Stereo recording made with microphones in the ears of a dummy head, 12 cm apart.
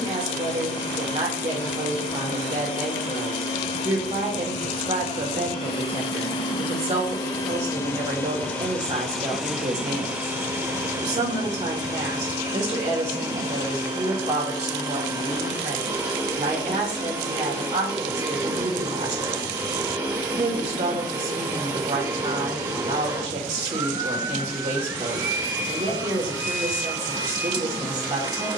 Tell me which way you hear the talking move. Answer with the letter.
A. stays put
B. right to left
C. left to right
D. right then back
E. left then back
A.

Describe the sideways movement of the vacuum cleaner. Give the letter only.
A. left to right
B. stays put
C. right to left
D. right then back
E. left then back
A.